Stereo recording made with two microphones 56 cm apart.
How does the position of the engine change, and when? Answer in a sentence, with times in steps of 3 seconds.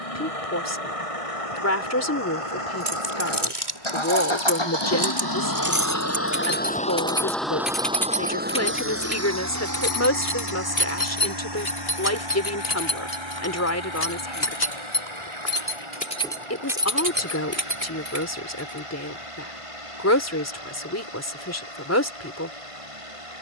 In this clip you hear the engine on the left from 0 s, in the centre from 6 s and on the right from 9 s.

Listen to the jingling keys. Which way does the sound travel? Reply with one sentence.
In this clip you hear the jingling keys go left and come back.